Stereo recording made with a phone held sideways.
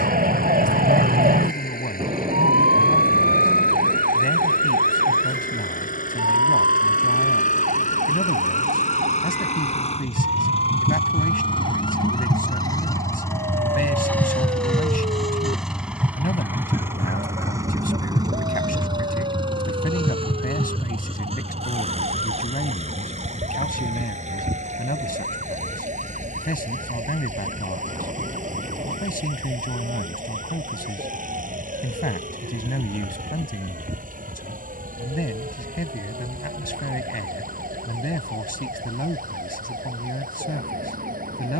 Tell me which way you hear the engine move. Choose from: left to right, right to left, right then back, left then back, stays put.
left to right.